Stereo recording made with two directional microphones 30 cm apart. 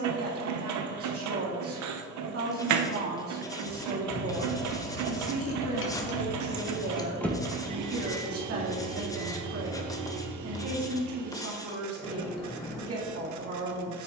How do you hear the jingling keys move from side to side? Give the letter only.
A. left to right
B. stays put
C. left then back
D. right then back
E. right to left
A.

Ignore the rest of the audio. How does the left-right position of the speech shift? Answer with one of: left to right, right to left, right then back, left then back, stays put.
stays put.